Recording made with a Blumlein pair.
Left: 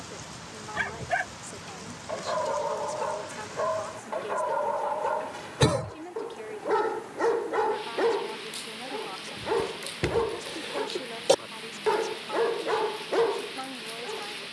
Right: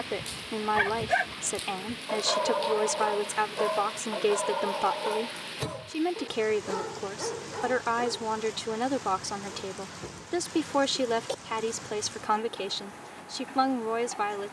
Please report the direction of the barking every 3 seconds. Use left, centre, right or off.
centre, centre, left, left, left.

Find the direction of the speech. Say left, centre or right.
right.